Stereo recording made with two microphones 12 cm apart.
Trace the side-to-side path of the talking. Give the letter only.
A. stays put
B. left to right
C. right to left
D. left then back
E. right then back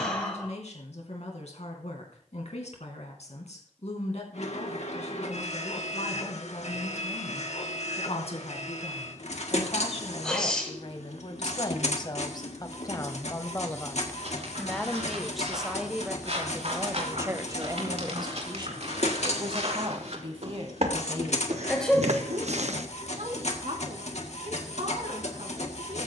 B.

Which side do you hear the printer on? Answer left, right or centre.
left.